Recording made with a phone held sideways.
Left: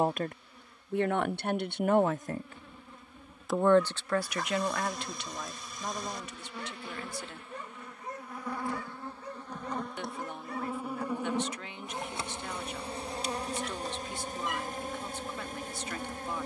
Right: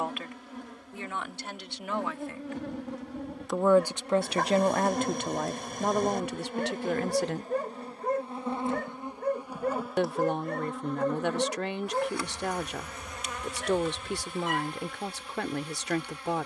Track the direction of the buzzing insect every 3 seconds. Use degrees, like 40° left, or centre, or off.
70° right, 60° right, 40° right, centre, 30° left, 40° left.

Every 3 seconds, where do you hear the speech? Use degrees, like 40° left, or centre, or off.
40° left, 30° right, 60° right, 60° right, 60° right, 60° right.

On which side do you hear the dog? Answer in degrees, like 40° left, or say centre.
50° right.